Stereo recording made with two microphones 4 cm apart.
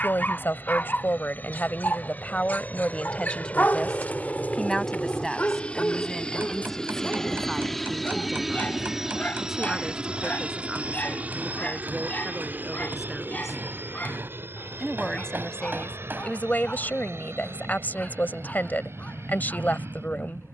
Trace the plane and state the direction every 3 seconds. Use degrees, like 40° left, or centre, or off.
50° left, 40° left, 10° left, 30° right, 50° right, 60° right, 70° right.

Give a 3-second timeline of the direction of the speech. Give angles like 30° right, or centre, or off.
50° left, 20° left, centre, 10° right, 10° right, 40° left, 50° left.